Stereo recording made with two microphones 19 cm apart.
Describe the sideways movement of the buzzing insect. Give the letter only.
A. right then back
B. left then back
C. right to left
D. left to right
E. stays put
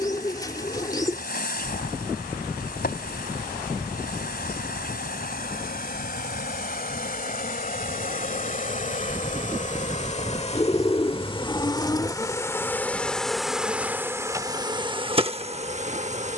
D.